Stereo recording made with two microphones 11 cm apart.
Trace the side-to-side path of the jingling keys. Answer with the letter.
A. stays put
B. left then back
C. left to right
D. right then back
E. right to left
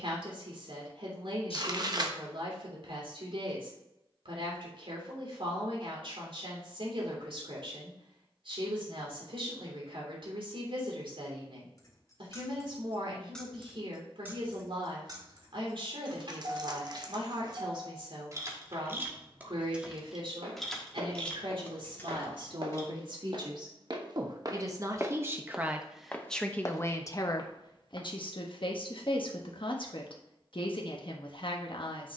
D.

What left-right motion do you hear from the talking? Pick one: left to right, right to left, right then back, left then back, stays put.
right to left.